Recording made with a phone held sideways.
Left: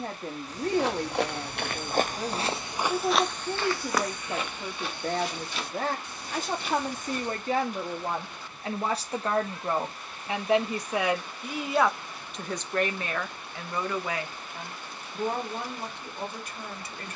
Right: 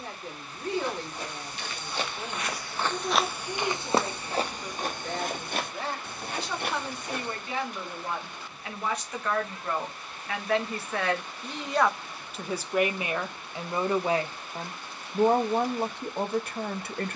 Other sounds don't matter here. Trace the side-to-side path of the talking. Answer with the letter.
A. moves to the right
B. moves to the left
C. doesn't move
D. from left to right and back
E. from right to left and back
A.